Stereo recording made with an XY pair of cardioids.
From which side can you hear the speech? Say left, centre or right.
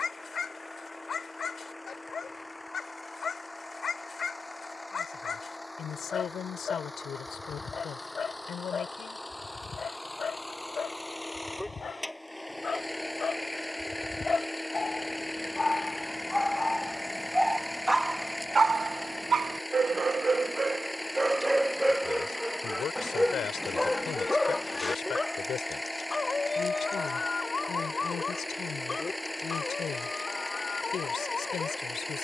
left.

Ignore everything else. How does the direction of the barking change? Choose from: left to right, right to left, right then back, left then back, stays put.
right then back.